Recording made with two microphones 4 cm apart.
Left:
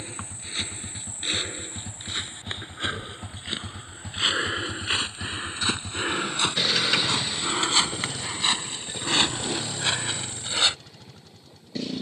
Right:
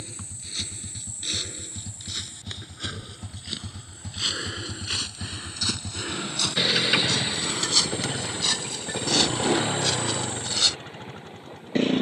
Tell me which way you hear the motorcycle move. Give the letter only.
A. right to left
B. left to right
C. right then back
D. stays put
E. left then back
B.